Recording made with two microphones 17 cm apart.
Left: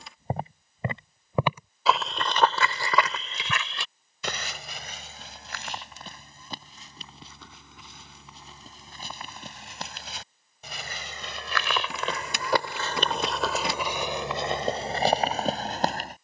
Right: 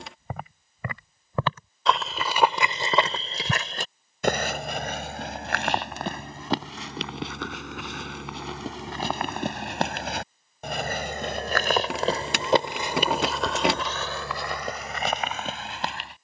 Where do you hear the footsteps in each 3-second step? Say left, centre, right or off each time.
centre, right, right, right, centre, left.